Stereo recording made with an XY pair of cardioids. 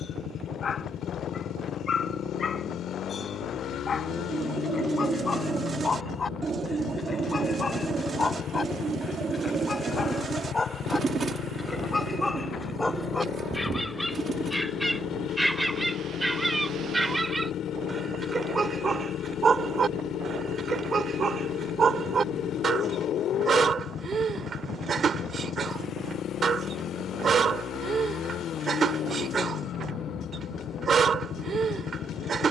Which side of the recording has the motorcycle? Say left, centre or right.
left.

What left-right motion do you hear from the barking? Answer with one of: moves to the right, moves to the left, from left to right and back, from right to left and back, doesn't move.
moves to the right.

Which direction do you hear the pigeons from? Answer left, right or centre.
right.